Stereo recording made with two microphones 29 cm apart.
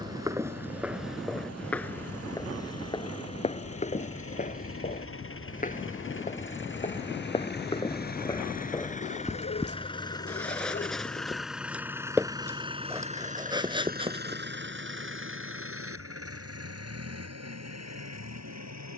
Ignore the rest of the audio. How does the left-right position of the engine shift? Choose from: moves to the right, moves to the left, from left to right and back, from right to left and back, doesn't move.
moves to the right.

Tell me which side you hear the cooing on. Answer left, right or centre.
left.